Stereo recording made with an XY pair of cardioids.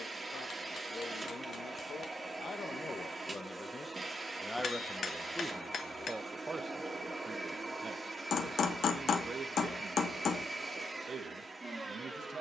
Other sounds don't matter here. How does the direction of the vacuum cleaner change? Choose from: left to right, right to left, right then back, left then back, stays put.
stays put.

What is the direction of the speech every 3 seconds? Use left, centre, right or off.
left, centre, right, right.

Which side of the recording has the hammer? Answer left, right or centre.
left.